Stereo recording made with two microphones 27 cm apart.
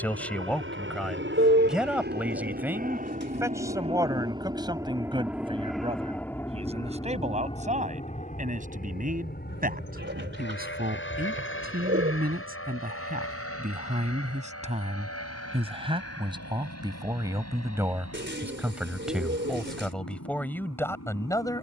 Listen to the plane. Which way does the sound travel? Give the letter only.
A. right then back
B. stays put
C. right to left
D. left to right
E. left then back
C.